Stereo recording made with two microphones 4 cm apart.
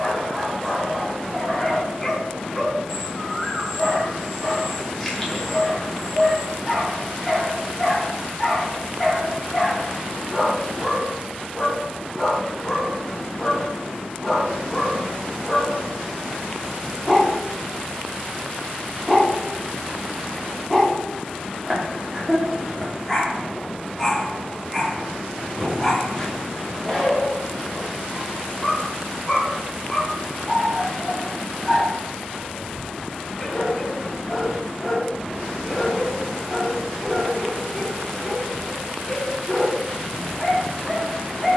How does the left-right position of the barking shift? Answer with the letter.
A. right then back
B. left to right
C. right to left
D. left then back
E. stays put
E.